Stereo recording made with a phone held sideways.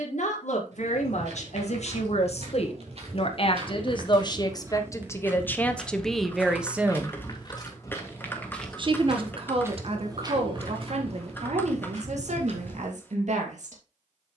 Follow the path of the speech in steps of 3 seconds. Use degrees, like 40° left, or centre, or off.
60° left, 30° left, 10° right, 50° right, 60° right.